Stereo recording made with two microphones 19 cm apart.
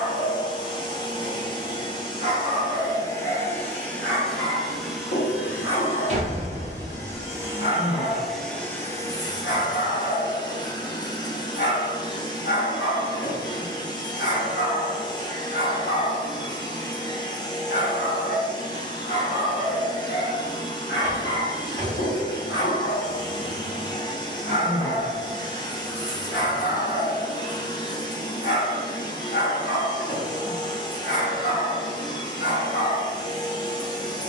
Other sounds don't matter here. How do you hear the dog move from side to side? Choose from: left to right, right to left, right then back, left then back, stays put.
stays put.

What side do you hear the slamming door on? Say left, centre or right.
right.